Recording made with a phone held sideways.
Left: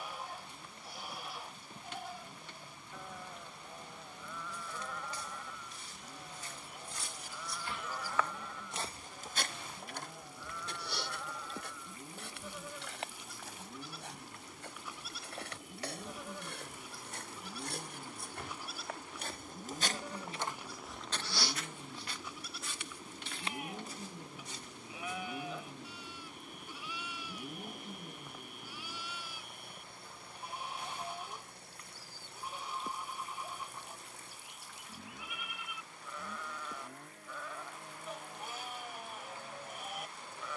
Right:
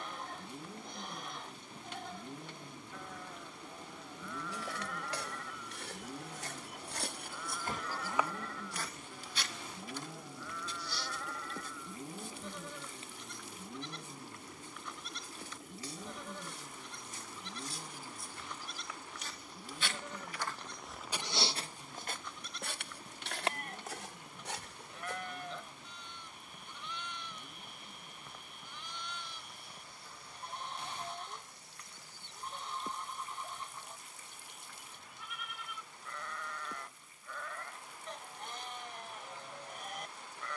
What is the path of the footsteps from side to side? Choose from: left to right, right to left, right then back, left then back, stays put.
left then back.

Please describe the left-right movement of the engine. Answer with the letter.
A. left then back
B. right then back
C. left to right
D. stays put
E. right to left
E.